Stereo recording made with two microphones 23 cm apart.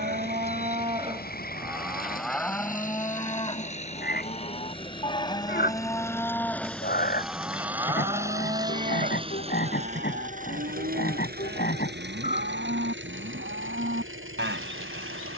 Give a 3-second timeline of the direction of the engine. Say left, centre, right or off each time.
left, left, centre, right, right.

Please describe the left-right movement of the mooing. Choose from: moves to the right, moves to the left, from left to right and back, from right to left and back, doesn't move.
from right to left and back.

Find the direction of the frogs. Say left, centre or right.
left.